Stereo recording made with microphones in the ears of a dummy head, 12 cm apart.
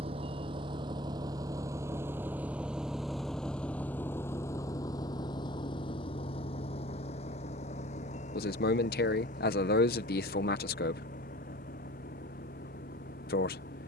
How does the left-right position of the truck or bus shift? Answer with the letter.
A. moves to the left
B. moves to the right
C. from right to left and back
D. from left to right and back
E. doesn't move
A.